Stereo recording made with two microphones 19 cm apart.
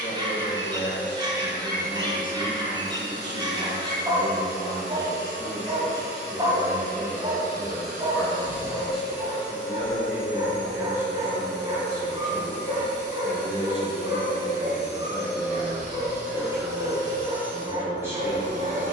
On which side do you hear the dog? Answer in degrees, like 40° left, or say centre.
20° right.